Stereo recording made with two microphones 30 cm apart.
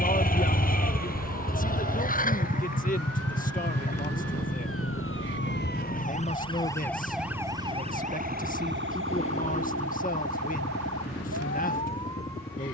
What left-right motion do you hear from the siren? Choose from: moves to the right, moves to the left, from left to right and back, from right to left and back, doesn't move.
moves to the right.